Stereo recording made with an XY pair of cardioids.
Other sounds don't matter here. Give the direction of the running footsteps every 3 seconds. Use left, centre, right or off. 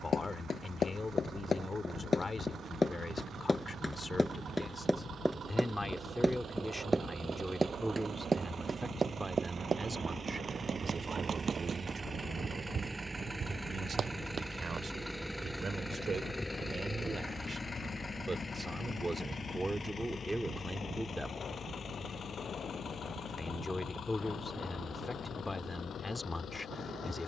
left, centre, right, right, right, off, off, off, off.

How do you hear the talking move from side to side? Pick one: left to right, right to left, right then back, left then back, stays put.
right then back.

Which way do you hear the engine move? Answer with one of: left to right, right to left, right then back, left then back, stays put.
right to left.